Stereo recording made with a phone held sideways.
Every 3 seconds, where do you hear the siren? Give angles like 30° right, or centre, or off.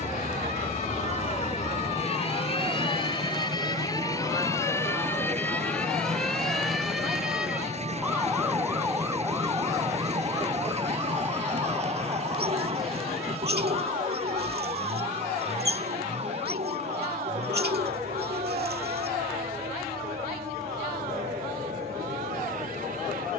40° left, 20° left, 10° right, 20° right, 40° right, 40° right, 50° right, 50° right.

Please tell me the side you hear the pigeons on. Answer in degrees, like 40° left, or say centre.
80° right.